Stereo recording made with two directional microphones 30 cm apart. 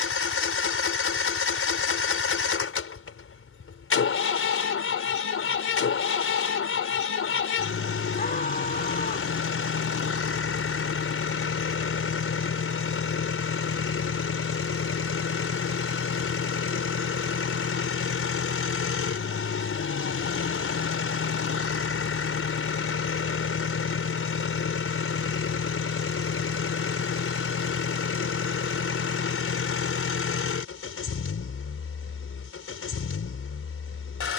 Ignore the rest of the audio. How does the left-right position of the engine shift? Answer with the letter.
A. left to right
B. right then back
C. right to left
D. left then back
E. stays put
E.